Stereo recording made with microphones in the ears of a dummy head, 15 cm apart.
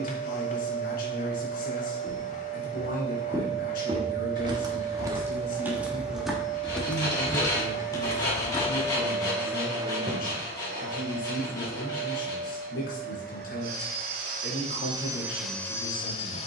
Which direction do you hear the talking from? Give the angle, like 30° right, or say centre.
60° left.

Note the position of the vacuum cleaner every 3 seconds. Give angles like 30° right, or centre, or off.
50° left, 50° left, 50° left, 50° right, 60° right, 10° left.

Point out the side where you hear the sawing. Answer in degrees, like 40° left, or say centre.
20° left.